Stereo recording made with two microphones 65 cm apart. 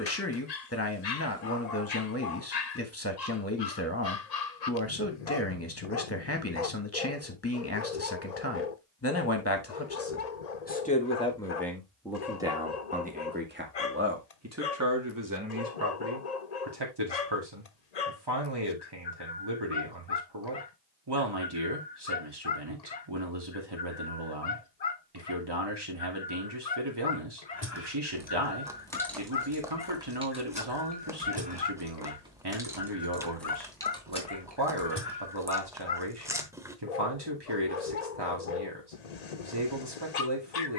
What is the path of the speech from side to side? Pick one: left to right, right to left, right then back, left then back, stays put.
left to right.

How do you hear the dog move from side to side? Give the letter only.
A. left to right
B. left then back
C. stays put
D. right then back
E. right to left
C.